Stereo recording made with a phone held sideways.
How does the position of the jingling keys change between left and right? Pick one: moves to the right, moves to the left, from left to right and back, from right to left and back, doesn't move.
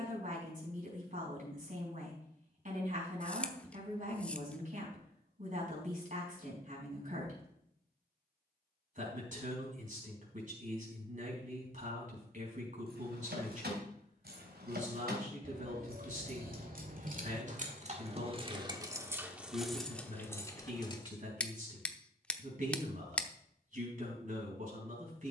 moves to the left.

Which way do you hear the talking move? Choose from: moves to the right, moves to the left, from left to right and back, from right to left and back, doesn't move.
doesn't move.